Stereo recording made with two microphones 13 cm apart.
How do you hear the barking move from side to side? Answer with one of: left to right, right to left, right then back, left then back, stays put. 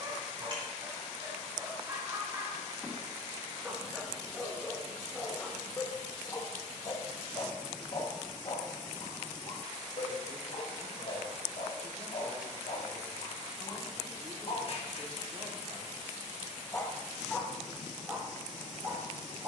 left then back.